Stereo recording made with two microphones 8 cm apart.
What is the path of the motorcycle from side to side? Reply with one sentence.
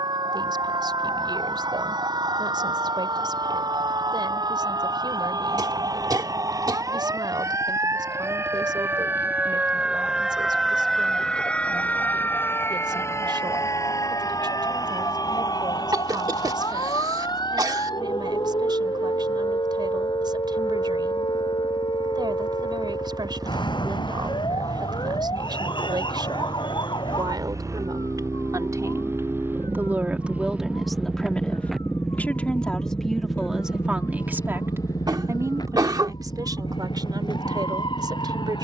You can hear the motorcycle travel towards the left.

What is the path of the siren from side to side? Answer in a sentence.
You can hear the siren travel towards the left.